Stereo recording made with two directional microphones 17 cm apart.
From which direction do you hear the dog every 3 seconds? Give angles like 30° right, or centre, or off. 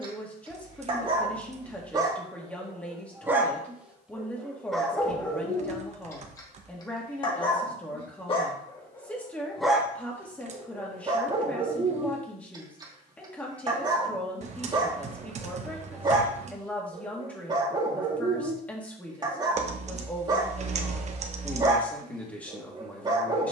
20° right, centre, 30° left, 10° right, 20° right, 20° right, 20° right, 20° right.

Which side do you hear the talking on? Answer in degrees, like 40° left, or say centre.
10° left.